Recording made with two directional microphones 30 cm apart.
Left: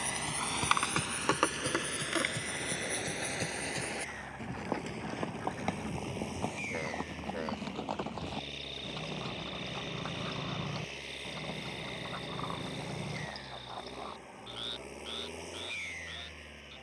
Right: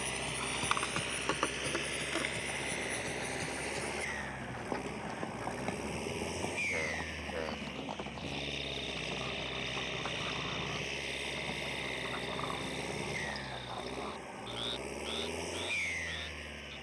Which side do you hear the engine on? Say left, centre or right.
right.